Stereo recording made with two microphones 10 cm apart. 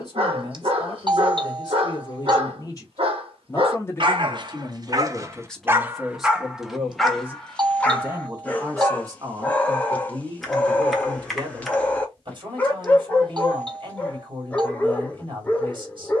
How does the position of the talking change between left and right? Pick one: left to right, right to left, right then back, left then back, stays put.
left to right.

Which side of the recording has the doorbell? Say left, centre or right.
right.